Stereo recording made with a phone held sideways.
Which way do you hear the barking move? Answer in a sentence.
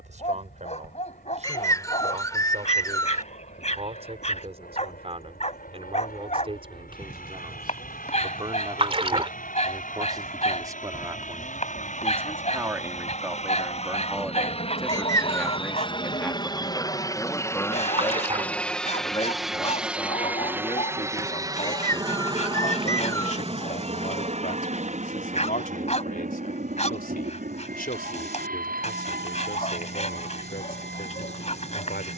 You can hear the barking stay in one place.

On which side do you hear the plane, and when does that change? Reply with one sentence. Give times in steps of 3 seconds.
You can hear the plane on the left from 0 s, in the centre from 18 s and on the right from 21 s.